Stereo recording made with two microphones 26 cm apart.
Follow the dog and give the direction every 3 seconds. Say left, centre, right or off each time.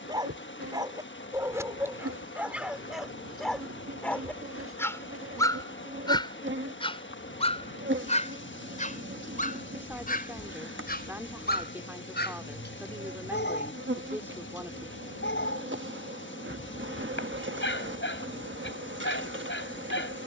centre, centre, left, left, left, left, left.